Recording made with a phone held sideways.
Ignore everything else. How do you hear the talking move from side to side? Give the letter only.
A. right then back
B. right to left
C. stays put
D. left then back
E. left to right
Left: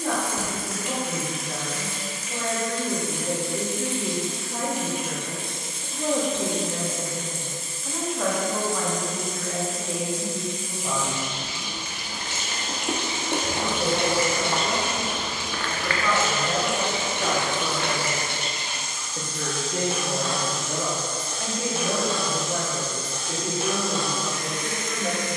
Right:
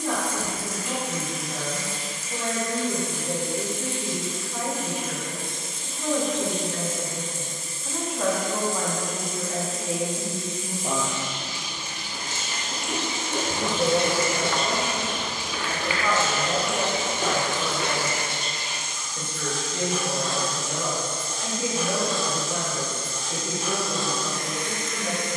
A.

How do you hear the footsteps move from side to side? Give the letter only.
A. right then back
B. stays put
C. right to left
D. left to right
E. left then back
D.